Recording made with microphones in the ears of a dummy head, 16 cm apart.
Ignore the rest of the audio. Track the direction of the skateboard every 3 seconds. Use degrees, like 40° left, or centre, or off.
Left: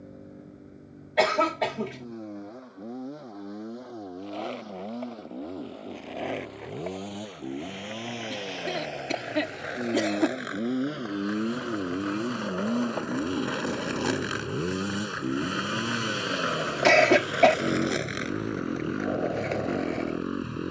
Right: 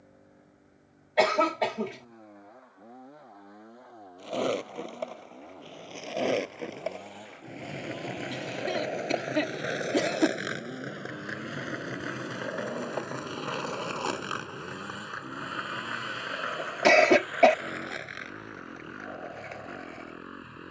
off, 50° right, 40° right, 30° right, 10° left, 40° left, 60° left.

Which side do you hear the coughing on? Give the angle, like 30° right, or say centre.
centre.